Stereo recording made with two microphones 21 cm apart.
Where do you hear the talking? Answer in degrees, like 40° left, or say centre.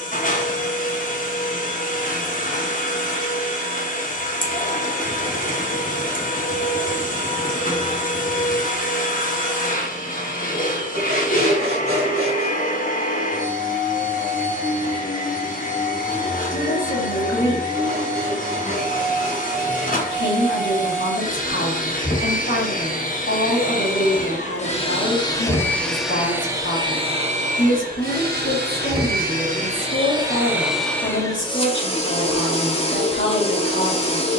60° left.